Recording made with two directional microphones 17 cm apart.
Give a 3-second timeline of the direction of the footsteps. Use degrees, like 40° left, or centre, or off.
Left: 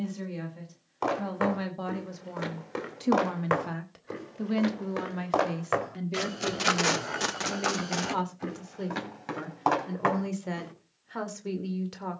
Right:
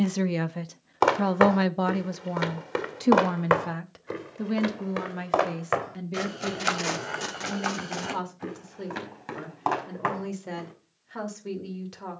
50° right, 20° right, centre, 10° left.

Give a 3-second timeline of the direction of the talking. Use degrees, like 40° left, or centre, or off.
50° right, 10° right, 10° left, 10° left.